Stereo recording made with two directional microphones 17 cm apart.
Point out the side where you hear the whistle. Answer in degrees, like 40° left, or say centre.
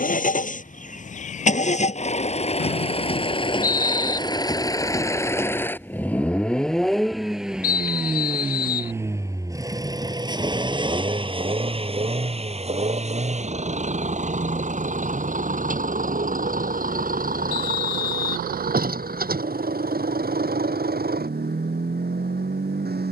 50° left.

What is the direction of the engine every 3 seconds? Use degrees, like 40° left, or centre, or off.
40° left, 20° left, centre, 20° right, 40° right, 50° right, 50° right, 60° right.